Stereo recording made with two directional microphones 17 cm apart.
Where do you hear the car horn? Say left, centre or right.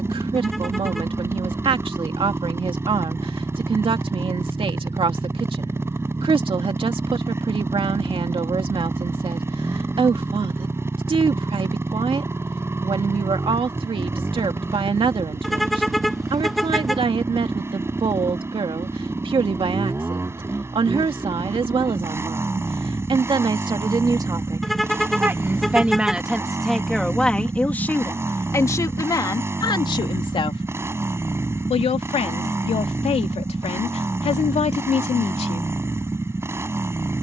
centre.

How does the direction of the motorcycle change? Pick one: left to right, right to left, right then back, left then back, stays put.
stays put.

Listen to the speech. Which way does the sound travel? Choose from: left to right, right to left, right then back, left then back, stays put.
right to left.